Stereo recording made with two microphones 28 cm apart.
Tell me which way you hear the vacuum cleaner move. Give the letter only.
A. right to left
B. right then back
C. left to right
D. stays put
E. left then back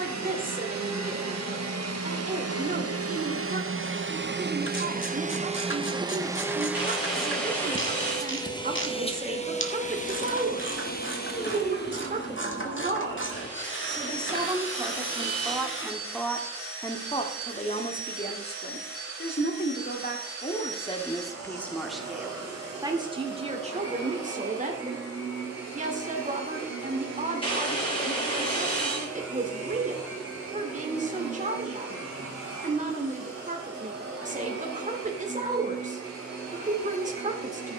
A.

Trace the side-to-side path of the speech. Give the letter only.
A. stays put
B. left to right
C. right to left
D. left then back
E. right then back
D.